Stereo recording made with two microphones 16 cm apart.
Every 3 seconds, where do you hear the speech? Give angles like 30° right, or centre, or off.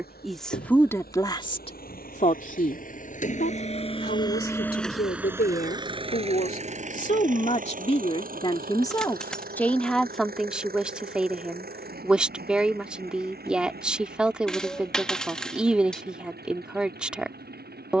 30° left, 70° left, 40° left, centre, 10° right, 10° right.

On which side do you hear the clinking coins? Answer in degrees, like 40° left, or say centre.
centre.